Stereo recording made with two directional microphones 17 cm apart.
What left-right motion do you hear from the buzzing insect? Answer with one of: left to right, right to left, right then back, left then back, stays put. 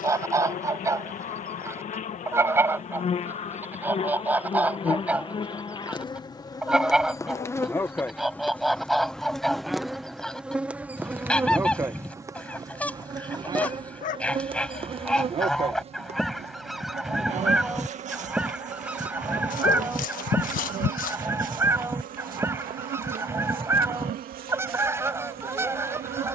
left to right.